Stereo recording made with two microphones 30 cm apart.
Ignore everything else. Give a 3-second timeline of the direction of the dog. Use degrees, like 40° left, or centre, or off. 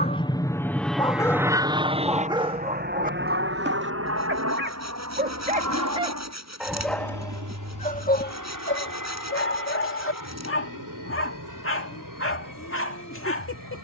centre, 30° right, 20° left, 40° left, 40° left.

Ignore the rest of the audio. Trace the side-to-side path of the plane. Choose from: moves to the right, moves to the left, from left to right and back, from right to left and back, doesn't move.
moves to the right.